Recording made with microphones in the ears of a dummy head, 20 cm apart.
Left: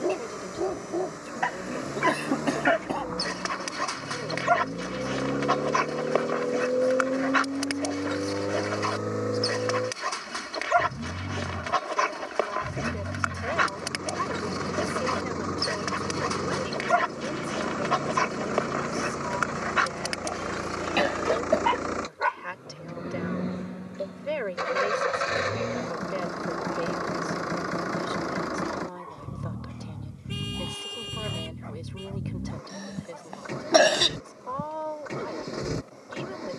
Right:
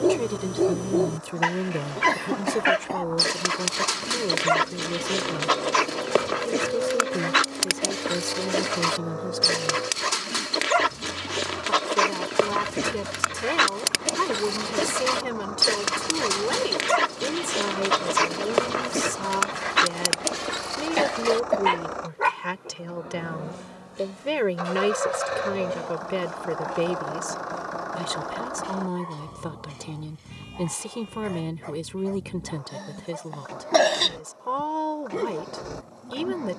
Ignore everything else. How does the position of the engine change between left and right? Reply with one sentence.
In this clip you hear the engine stay in one place.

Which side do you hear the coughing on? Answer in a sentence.
You can hear the coughing in the centre.